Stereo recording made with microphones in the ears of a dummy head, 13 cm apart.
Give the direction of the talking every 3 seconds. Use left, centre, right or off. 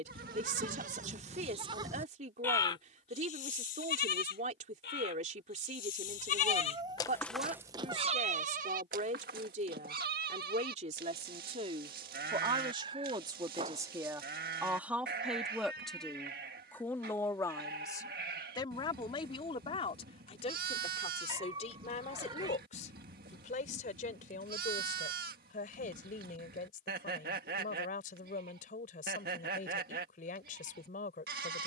right, right, right, right, right, centre, left, left, left, left, left.